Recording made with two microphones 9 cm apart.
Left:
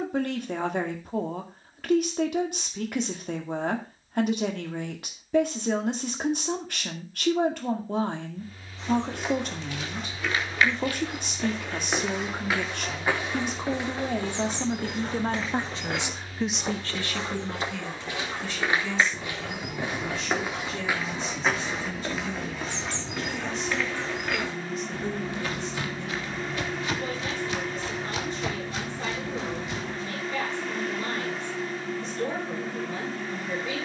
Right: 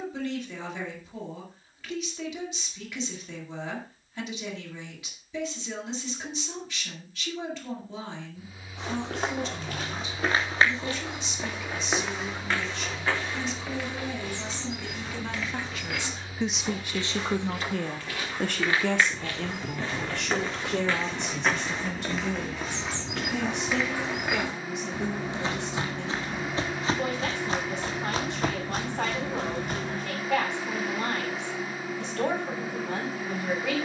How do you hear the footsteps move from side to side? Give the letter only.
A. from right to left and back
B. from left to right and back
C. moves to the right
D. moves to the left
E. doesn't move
A.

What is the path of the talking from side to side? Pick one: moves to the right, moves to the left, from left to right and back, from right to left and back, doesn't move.
moves to the right.